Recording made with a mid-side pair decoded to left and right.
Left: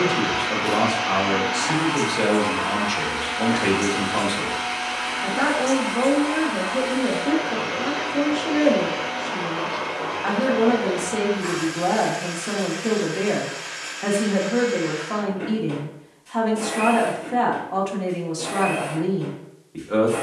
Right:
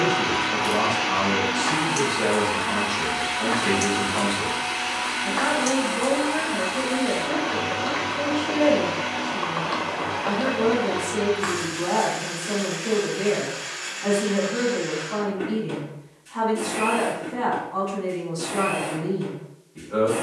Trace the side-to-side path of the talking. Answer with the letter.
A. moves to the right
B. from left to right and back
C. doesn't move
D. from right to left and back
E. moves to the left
C.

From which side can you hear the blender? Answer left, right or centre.
centre.